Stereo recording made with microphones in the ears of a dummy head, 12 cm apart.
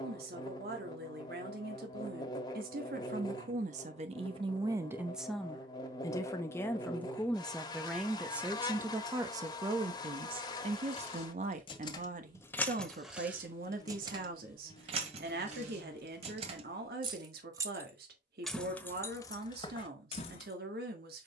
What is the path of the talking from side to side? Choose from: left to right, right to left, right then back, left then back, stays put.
left then back.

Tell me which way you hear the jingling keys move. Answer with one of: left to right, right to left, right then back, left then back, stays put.
right then back.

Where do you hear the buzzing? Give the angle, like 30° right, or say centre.
30° left.